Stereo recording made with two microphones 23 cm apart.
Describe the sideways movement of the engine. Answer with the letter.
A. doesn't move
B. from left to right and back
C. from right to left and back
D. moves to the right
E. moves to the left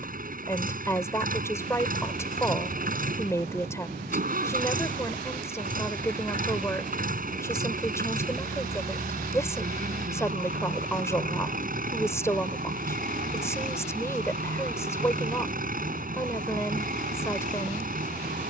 A.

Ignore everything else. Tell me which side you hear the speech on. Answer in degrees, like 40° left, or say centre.
10° left.